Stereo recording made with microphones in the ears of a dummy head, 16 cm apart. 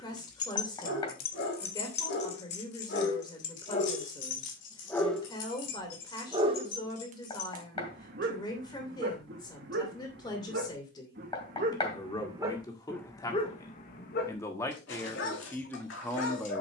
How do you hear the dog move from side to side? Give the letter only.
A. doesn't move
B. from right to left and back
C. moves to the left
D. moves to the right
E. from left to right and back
E.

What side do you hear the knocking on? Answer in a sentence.
You can hear the knocking on the left.